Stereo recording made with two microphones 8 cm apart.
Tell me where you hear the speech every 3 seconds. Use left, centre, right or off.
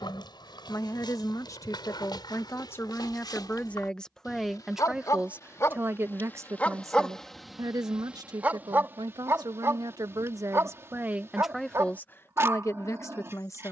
left, centre, right, right, left.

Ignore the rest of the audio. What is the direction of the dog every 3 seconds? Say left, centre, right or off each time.
left, left, centre, right, right.